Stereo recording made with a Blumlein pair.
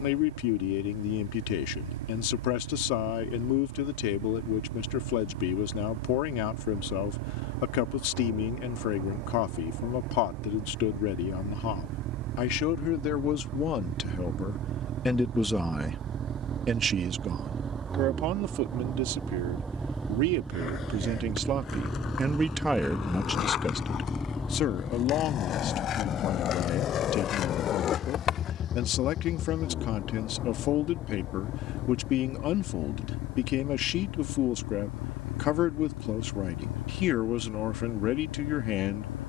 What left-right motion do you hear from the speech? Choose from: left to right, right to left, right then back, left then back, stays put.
right then back.